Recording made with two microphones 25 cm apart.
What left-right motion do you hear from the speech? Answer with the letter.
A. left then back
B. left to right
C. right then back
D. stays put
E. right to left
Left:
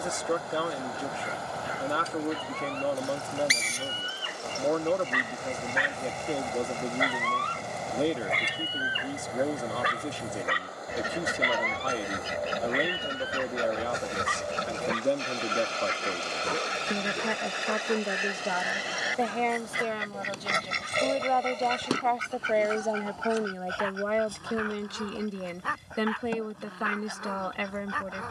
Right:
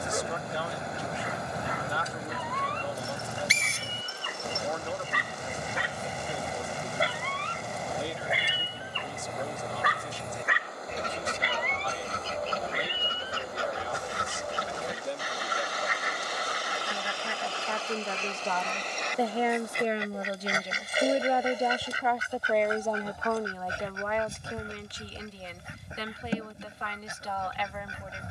C.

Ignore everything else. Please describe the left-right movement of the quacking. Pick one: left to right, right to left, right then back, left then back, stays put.
left then back.